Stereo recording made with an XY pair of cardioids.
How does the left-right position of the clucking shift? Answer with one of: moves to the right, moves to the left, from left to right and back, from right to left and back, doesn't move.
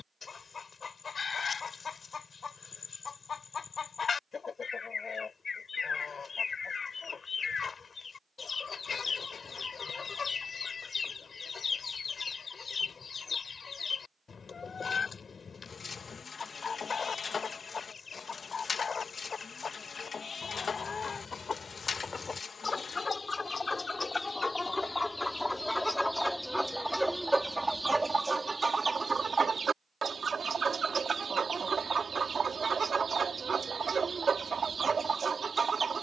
moves to the right.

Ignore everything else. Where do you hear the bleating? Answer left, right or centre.
left.